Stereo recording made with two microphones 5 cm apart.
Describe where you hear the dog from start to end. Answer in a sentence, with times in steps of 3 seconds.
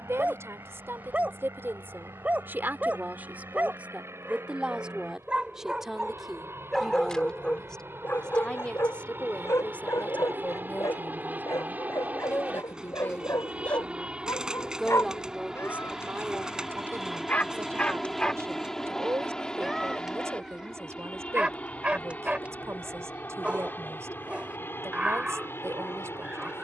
In this clip you hear the dog on the right from 0 s, on the left from 6 s, in the centre from 18 s and on the right from 21 s.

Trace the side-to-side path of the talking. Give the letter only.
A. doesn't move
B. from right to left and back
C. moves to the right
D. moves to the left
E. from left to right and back
B.